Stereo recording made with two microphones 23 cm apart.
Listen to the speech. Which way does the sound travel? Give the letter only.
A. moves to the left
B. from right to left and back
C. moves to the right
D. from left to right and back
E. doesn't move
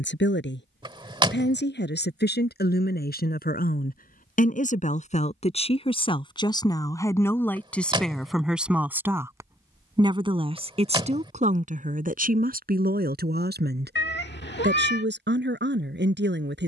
C.